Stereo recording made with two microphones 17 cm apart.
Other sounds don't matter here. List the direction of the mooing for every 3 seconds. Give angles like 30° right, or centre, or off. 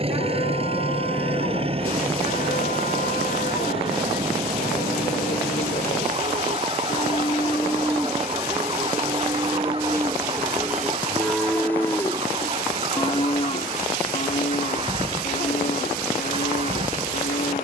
60° left, 60° left, 20° left, 10° right, 40° left, 60° left.